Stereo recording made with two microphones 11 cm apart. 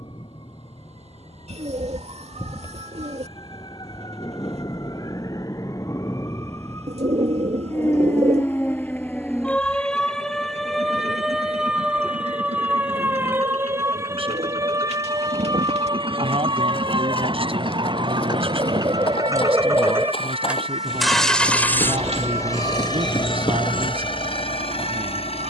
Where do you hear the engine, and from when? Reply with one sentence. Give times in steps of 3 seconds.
In this clip you hear the engine on the right from 0 s and on the left from 21 s.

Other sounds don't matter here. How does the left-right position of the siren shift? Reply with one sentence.
In this clip you hear the siren move to the right.